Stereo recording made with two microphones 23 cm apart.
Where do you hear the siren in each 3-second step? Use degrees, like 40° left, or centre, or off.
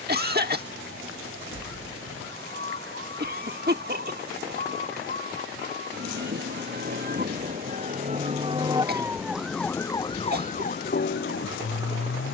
70° right, 60° right, 40° right, 30° left.